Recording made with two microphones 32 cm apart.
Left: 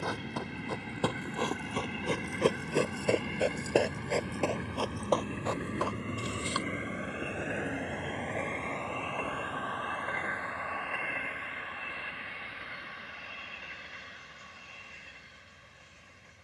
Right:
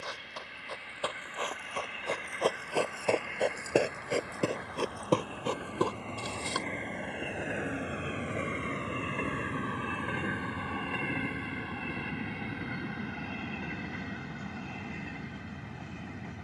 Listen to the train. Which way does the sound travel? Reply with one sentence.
In this clip you hear the train travel towards the right.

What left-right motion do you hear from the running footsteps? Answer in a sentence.
You can hear the running footsteps move from left to right.